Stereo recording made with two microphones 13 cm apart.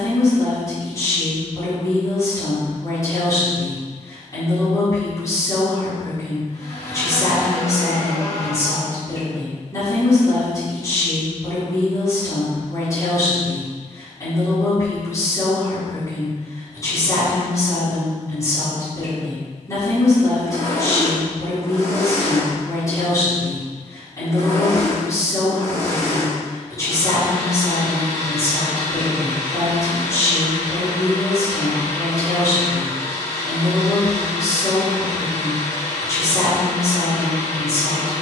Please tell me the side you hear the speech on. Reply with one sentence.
You can hear the speech on the left.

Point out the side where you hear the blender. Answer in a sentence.
You can hear the blender on the left.